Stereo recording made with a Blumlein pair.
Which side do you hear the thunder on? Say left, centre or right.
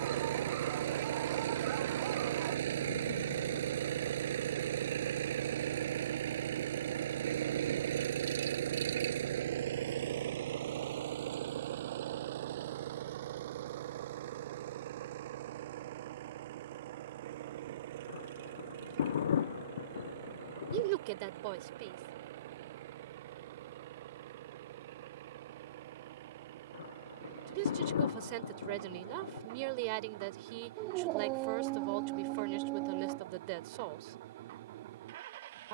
left.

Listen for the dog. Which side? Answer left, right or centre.
right.